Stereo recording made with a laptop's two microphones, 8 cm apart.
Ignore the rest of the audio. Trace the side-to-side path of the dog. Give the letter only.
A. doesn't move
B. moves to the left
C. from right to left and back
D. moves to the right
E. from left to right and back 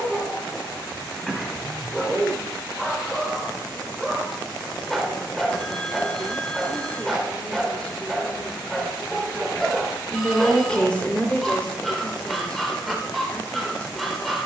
A.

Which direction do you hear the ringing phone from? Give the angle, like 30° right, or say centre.
10° left.